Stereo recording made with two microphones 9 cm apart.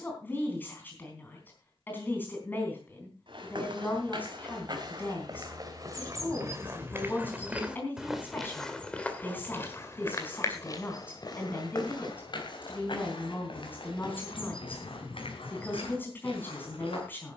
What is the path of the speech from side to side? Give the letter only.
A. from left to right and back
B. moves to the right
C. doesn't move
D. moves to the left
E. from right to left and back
C.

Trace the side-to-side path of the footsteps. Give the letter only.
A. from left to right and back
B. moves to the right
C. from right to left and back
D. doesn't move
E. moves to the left
E.